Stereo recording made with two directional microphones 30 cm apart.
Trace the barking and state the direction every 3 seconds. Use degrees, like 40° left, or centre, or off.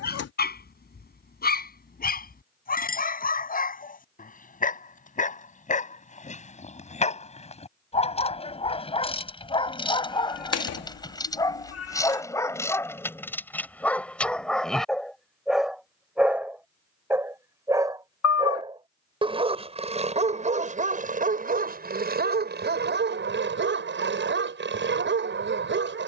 30° left, 30° left, 20° left, 10° left, 10° left, 10° right, 20° right, 30° right, 40° right.